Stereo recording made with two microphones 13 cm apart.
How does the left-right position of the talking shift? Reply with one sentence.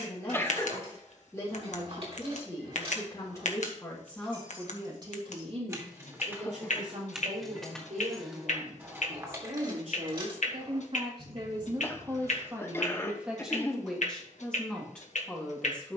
You can hear the talking go right and come back.